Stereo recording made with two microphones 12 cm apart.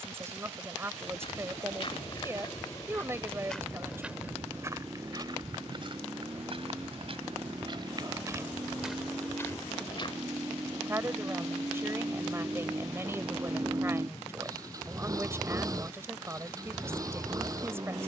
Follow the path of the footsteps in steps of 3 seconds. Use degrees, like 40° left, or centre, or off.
40° left, 20° right, 40° right, 30° left, off, off.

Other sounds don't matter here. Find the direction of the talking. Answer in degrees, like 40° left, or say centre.
20° right.